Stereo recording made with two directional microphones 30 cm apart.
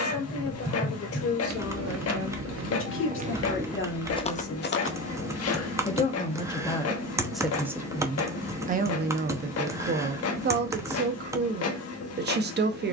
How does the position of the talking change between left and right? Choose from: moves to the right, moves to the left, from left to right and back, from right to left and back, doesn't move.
moves to the right.